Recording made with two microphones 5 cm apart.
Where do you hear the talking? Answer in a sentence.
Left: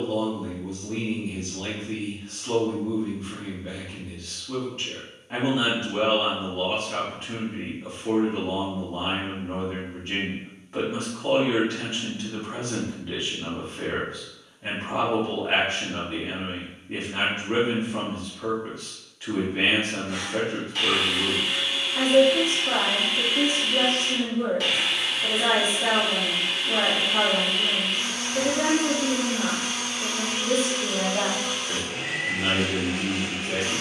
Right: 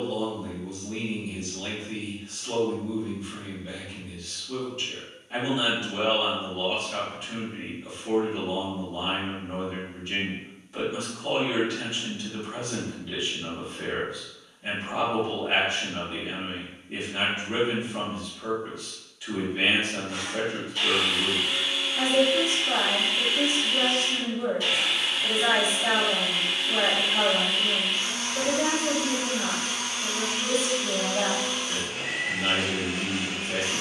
In this clip you hear the talking on the left.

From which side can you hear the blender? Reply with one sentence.
In this clip you hear the blender on the left.